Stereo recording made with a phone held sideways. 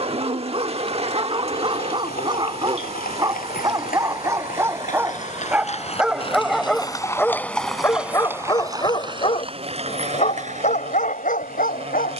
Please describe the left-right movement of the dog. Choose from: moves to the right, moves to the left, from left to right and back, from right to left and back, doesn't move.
moves to the left.